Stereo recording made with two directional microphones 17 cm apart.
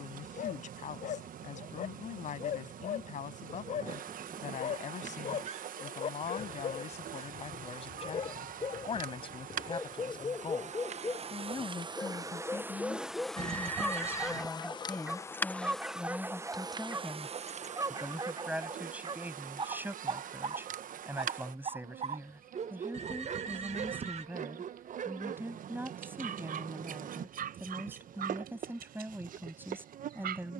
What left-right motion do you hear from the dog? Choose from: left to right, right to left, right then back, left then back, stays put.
left to right.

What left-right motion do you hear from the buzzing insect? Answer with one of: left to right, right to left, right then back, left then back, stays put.
left then back.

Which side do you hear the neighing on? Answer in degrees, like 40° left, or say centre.
40° right.